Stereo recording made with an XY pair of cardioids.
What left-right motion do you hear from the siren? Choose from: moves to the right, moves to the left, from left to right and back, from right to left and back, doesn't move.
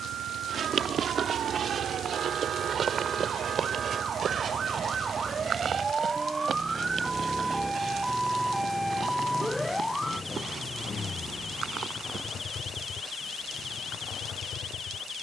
moves to the left.